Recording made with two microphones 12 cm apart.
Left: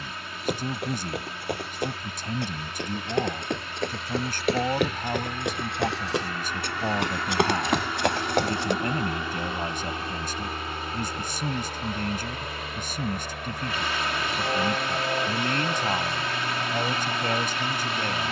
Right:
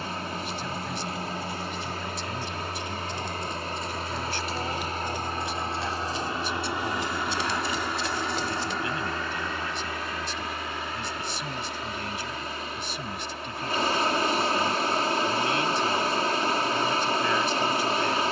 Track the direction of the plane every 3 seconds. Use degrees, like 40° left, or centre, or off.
60° right, 40° right, 10° right, 30° left, 50° left, 60° left.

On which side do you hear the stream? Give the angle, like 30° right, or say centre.
40° right.